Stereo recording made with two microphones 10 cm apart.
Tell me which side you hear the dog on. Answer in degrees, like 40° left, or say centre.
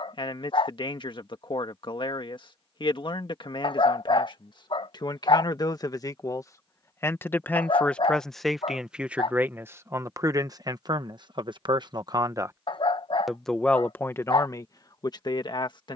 60° left.